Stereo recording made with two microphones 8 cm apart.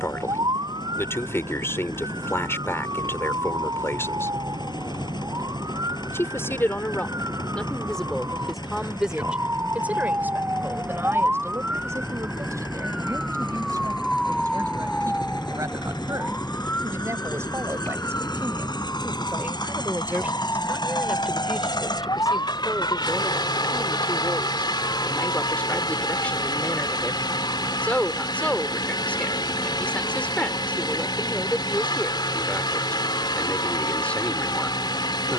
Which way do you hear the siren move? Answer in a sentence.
You can hear the siren move to the left.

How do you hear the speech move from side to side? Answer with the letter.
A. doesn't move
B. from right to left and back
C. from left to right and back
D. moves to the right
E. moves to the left
C.